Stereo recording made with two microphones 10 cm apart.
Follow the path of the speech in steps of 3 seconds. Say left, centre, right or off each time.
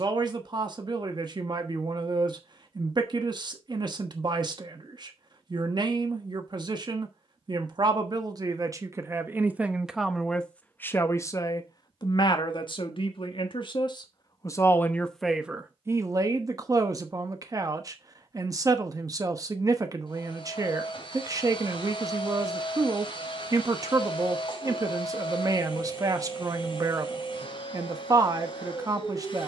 right, right, right, centre, left, right, right, right, right, right.